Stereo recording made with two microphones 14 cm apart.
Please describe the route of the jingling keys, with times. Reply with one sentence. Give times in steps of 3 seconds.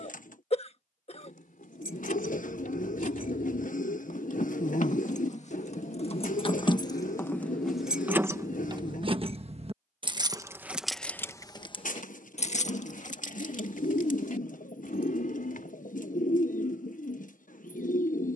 In this clip you hear the jingling keys on the left from 0 s, in the centre from 6 s and on the left from 12 s.